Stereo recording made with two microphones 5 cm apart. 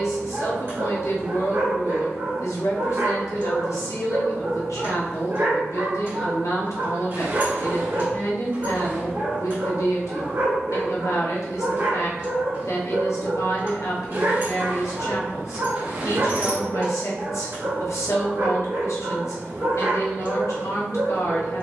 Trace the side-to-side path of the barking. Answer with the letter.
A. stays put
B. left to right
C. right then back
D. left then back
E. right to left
A.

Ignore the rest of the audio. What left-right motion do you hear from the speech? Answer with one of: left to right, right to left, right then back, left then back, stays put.
stays put.